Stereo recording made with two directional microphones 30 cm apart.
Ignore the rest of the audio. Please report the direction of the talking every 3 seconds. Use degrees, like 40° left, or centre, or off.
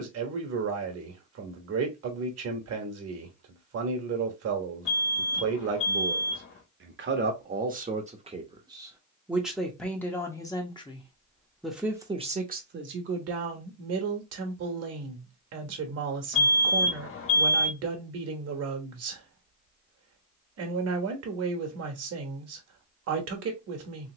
50° right, 50° right, 30° right, 10° left, 40° right, 50° right, 50° right, 50° right.